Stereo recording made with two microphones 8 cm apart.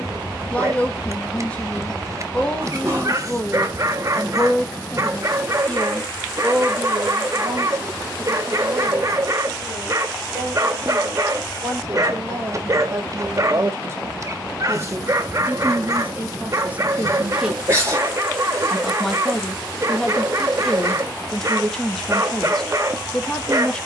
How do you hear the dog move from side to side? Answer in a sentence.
In this clip you hear the dog stay in one place.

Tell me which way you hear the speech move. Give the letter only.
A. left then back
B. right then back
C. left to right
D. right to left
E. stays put
B.